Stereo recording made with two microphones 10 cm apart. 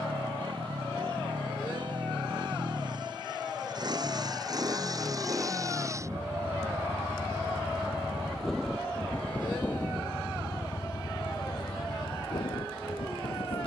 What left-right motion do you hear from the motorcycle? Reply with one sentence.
You can hear the motorcycle move to the left.